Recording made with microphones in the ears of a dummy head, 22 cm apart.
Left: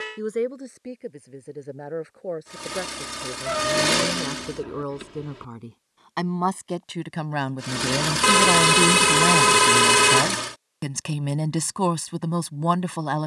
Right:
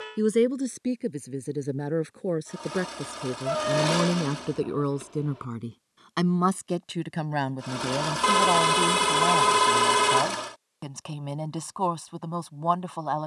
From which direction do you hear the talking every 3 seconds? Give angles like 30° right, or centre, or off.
50° right, 30° right, 10° left, 30° left, 30° left.